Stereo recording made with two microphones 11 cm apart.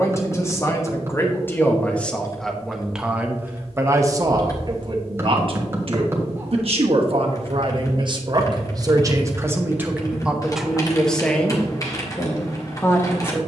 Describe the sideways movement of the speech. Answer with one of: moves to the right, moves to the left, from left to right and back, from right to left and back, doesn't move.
from left to right and back.